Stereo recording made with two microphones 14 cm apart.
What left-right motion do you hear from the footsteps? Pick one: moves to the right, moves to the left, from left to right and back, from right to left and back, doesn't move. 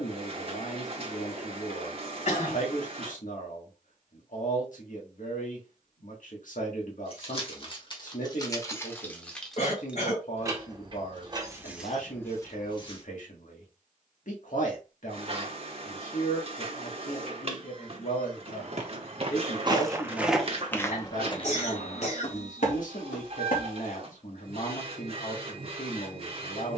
moves to the left.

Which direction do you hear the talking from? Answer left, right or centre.
left.